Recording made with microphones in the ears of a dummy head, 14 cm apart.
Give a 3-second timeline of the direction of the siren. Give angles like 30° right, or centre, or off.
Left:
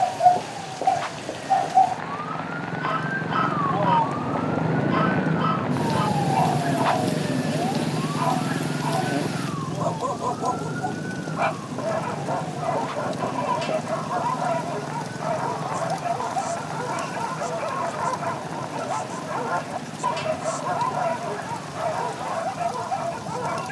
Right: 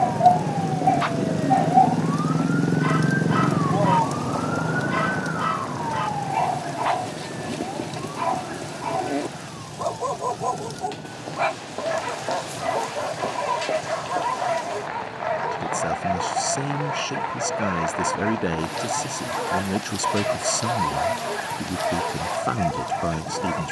60° right, 10° left, 50° left, 70° left, 70° left, 80° left, 80° left, 80° left.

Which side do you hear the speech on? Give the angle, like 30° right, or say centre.
80° right.